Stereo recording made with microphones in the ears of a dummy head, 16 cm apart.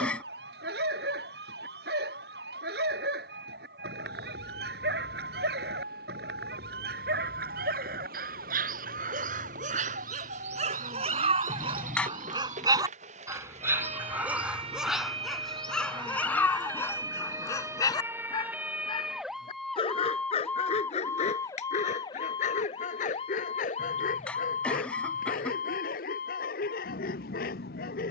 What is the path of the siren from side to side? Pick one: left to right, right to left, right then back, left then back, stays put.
right to left.